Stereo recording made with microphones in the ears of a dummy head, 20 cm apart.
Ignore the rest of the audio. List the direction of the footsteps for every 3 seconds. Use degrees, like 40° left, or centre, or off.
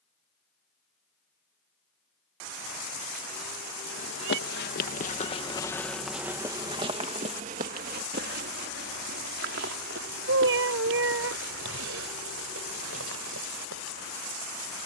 off, 40° left, 30° right, 60° right, 70° right.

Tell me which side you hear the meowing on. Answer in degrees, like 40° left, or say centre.
60° right.